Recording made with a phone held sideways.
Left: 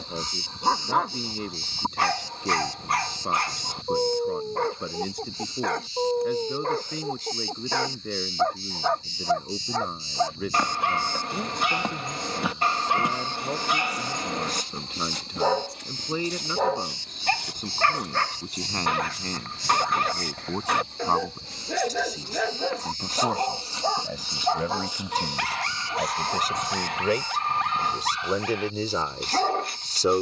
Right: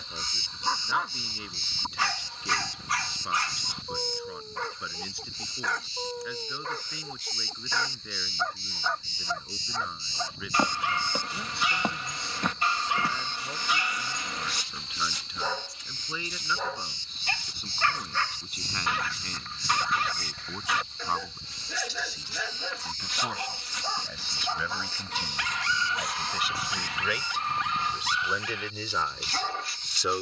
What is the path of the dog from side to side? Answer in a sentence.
You can hear the dog stay put.